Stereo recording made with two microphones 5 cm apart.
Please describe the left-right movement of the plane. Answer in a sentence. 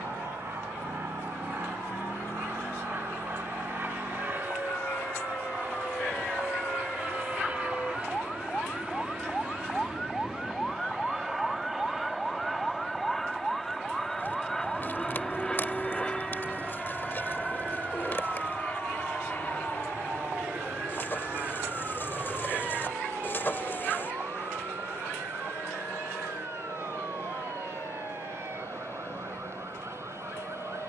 You can hear the plane move to the left.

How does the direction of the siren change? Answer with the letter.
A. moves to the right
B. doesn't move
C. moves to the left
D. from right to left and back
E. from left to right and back
A.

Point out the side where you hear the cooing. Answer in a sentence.
In this clip you hear the cooing on the left.